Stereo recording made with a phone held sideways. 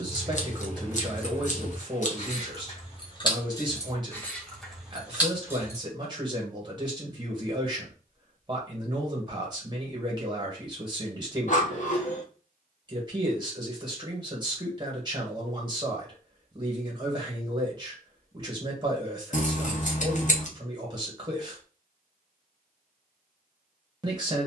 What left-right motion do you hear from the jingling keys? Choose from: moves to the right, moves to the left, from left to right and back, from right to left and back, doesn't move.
from right to left and back.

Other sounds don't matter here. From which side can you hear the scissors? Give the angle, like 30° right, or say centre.
50° left.